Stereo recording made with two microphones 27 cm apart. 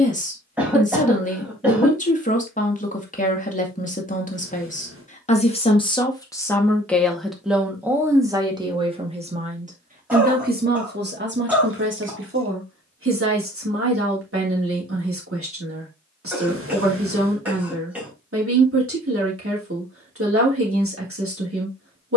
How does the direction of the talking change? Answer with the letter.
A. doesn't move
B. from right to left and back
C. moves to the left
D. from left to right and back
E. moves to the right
E.